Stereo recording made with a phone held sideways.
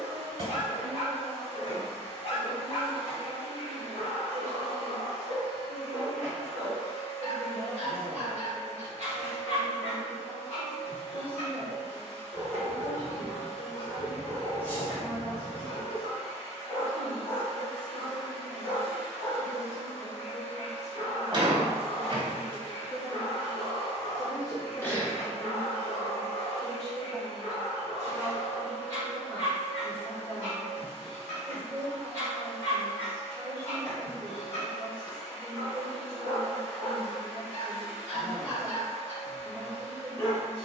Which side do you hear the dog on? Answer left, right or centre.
left.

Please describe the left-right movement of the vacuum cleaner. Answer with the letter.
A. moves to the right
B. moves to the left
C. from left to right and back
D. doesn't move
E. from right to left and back
D.